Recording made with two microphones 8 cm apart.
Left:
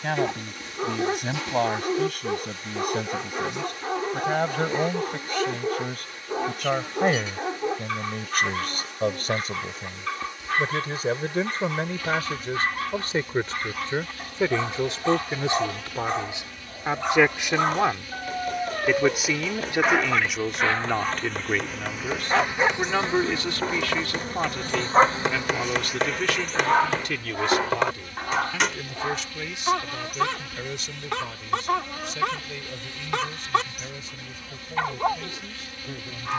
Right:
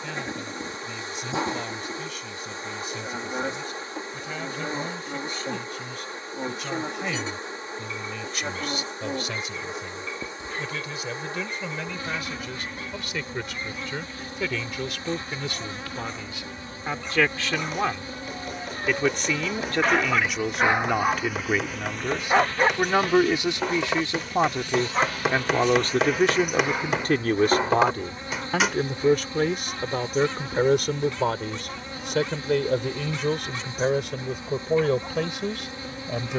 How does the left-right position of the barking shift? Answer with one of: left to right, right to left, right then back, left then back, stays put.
right then back.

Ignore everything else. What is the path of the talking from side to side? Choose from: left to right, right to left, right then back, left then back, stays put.
left to right.